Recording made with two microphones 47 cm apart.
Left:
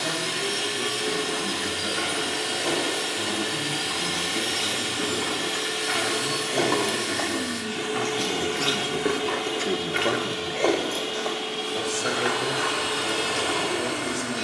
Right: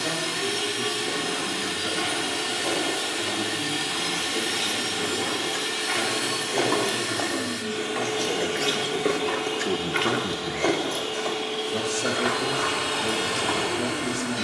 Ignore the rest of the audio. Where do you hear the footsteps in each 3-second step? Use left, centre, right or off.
left, left, left, right, right.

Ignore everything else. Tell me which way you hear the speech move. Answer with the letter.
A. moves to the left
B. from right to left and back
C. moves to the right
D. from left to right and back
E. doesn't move
C.